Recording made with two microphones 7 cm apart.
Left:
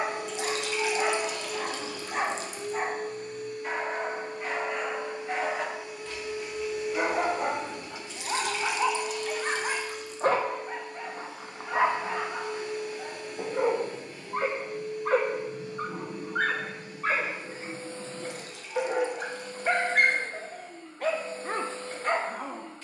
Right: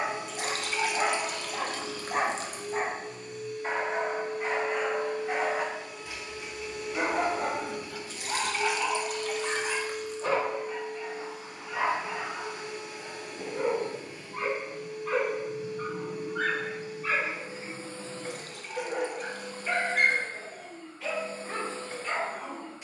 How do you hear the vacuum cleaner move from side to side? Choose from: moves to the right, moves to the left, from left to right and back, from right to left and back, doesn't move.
moves to the right.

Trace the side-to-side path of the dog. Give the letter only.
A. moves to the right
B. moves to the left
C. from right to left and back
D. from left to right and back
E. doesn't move
B.